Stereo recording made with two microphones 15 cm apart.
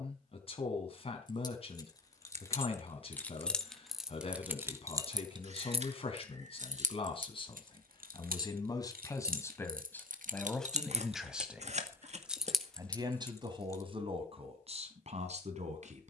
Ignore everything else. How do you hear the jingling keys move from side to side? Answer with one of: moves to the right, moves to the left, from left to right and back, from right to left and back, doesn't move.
from left to right and back.